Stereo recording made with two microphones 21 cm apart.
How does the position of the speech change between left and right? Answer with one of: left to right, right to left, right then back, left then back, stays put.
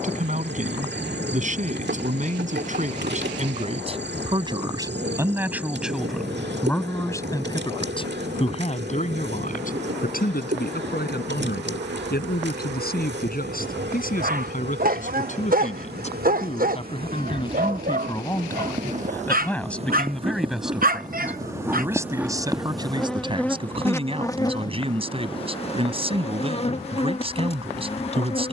left then back.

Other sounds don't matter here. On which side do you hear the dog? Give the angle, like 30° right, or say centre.
40° right.